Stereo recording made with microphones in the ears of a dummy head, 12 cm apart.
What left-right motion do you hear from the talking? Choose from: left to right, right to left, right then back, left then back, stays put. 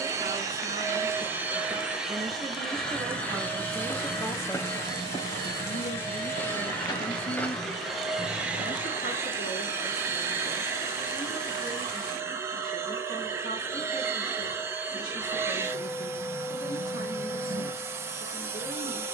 right to left.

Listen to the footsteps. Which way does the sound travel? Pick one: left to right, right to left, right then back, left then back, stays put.
left then back.